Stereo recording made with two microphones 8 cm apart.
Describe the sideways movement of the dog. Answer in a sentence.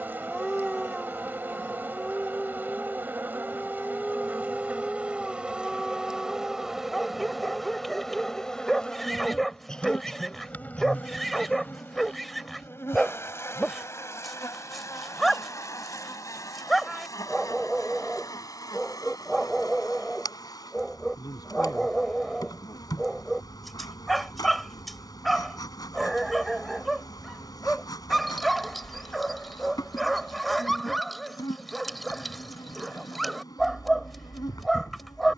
In this clip you hear the dog stay put.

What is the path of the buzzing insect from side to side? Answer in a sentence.
You can hear the buzzing insect move to the left.